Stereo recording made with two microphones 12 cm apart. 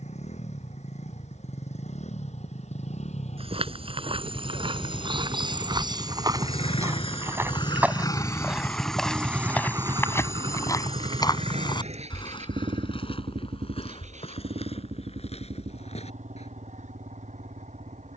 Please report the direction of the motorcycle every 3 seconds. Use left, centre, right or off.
left, left, left, right, right, right.